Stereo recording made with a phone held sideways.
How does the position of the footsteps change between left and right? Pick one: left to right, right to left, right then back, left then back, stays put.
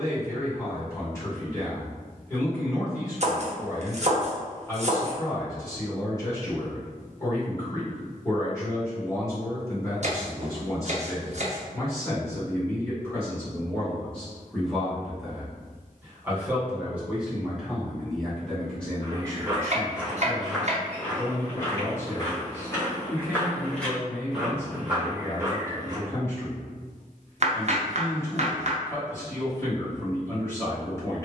left then back.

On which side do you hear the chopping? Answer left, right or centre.
right.